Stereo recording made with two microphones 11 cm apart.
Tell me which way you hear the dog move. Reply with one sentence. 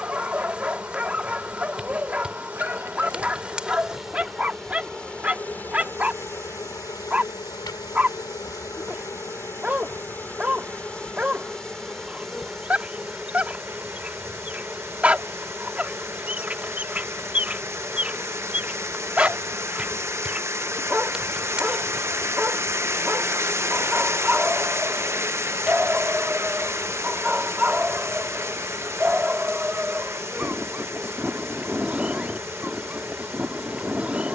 In this clip you hear the dog stay in one place.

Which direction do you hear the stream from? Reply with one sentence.
You can hear the stream on the right.